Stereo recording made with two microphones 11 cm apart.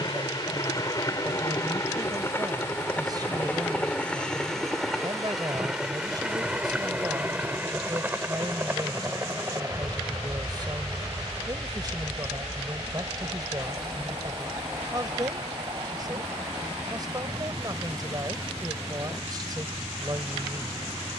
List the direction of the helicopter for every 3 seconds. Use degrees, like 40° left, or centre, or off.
30° left, 10° left, 10° right, 30° right, 40° right, 40° right, 50° right.